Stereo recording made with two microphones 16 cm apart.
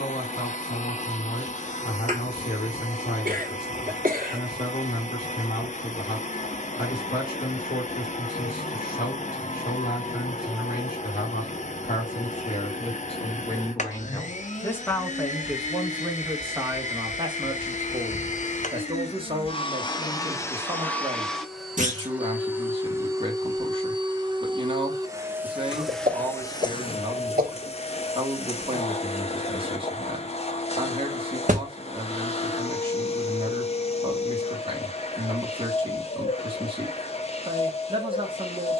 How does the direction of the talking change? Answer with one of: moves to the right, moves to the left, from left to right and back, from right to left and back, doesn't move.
moves to the right.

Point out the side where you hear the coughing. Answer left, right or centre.
right.